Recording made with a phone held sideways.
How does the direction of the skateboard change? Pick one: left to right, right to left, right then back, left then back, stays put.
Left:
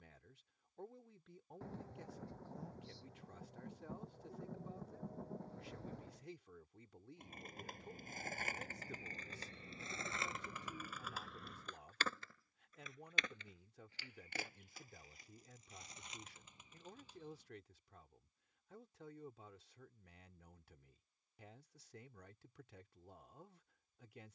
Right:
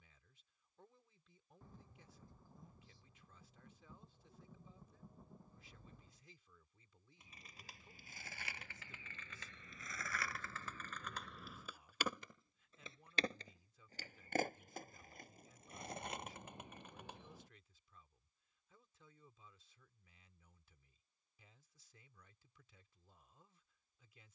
left to right.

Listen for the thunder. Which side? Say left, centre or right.
left.